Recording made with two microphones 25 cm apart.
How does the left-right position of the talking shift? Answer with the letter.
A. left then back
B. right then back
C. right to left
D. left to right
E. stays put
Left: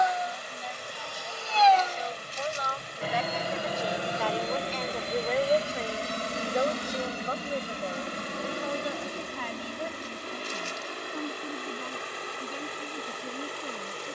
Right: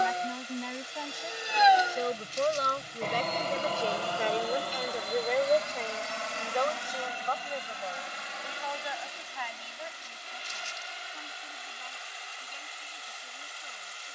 C.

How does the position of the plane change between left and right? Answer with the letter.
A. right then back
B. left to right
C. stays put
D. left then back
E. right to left
E.